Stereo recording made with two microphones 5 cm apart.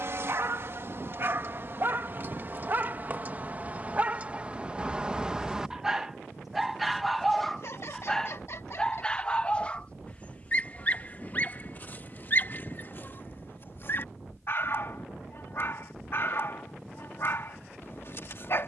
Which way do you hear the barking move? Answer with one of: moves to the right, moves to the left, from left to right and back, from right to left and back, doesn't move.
moves to the left.